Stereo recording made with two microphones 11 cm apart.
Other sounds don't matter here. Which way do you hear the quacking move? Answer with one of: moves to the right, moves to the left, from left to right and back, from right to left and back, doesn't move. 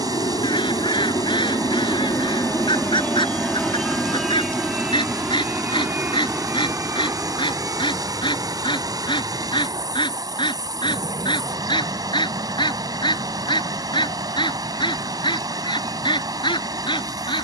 doesn't move.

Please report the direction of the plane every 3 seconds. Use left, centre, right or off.
left, centre, right, right, right, right.